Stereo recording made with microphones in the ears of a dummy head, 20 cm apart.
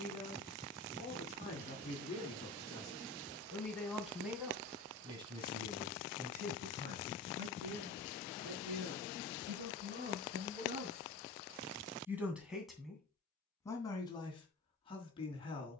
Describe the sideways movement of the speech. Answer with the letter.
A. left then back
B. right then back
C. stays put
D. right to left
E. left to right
B.